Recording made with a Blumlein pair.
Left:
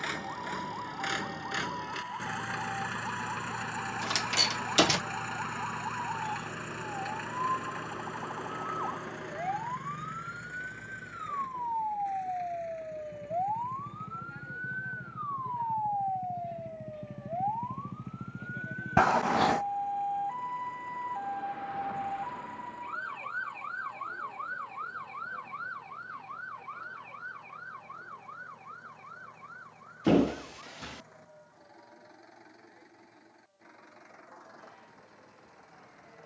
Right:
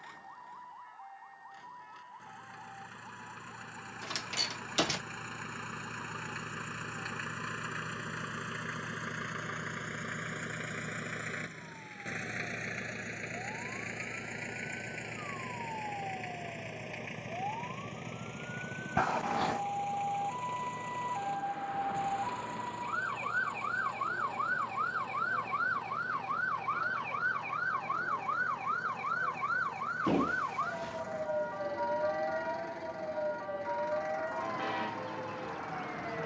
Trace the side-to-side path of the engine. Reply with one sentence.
In this clip you hear the engine move from left to right.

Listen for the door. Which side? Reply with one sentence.
In this clip you hear the door on the left.